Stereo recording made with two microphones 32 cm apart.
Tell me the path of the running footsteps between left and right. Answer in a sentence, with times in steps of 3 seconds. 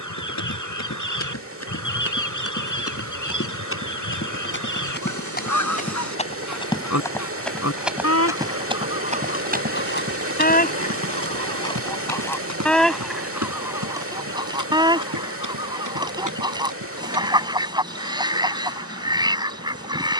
You can hear the running footsteps on the left from 0 s, in the centre from 6 s, on the right from 9 s and not at all from 18 s.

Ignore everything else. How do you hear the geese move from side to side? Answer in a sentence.
In this clip you hear the geese travel towards the right.